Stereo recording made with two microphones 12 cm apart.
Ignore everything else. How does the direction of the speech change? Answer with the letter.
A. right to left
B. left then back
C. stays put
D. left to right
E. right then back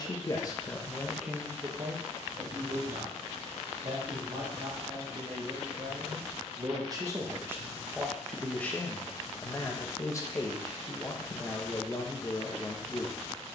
E.